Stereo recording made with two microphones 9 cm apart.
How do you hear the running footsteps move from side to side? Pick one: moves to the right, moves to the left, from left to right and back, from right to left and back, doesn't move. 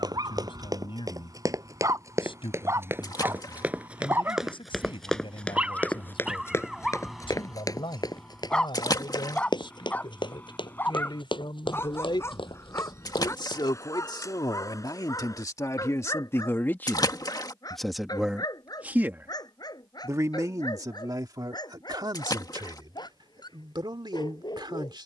moves to the left.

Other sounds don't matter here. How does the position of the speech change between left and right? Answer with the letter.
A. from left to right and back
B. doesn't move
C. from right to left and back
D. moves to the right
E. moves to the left
D.